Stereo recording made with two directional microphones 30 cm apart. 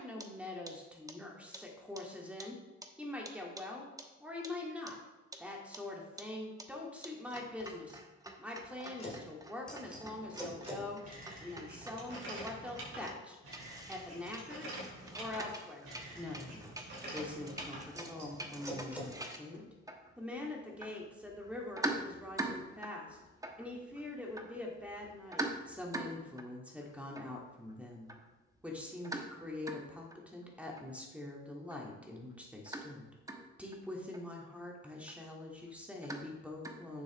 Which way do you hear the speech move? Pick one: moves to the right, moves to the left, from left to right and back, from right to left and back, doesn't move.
doesn't move.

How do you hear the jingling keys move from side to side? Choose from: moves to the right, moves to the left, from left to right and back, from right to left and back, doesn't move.
from left to right and back.